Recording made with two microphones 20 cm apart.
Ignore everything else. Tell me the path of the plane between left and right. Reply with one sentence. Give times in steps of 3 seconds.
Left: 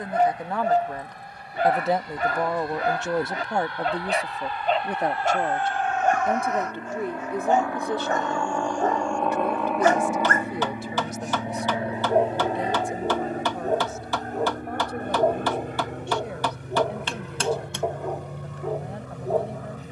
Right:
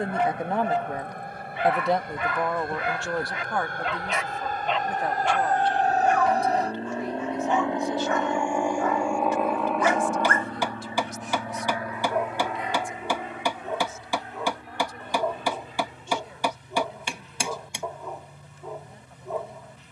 In this clip you hear the plane on the right from 0 s, in the centre from 9 s and on the left from 12 s.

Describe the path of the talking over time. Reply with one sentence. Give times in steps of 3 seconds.
In this clip you hear the talking in the centre from 0 s and on the left from 3 s.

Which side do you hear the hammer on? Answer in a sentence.
In this clip you hear the hammer in the centre.